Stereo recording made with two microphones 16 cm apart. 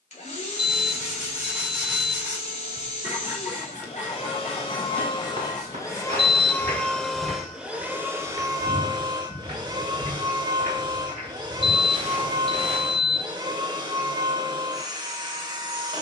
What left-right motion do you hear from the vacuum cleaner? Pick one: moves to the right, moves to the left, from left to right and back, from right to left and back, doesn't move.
moves to the right.